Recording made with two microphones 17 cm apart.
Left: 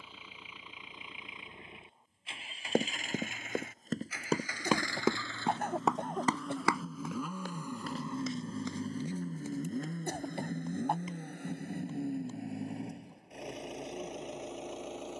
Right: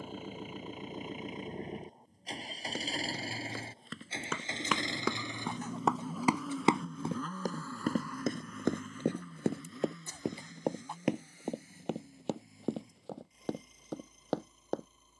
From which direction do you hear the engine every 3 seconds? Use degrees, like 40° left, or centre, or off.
40° right, 20° right, 10° left, 50° left, 80° left.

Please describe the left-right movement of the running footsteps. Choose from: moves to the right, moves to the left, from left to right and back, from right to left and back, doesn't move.
moves to the right.